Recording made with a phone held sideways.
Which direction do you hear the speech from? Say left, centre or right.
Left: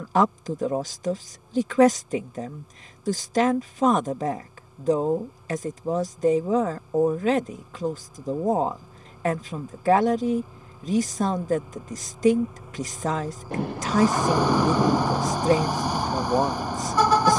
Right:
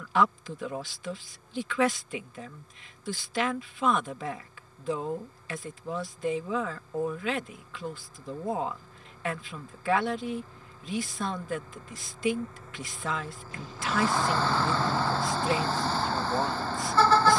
left.